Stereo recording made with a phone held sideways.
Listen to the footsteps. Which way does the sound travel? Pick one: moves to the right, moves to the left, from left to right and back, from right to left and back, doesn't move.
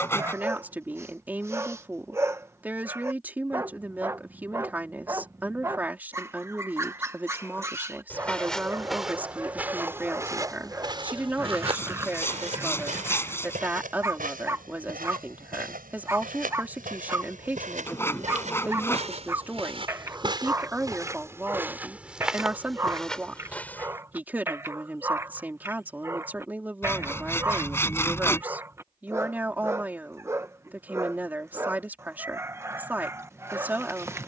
from left to right and back.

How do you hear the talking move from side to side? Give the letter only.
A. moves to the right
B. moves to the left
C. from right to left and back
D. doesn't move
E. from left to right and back
D.